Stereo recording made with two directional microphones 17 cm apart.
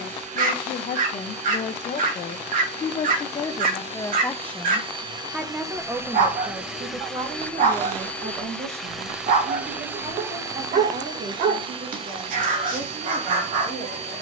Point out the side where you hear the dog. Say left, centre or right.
right.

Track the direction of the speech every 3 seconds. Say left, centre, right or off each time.
left, centre, right, right, right.